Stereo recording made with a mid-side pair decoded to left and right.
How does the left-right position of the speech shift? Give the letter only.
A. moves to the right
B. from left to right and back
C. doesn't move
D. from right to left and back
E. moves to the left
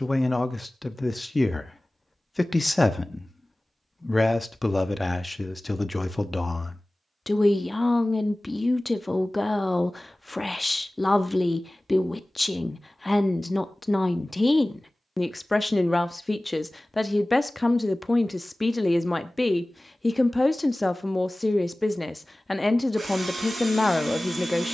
C.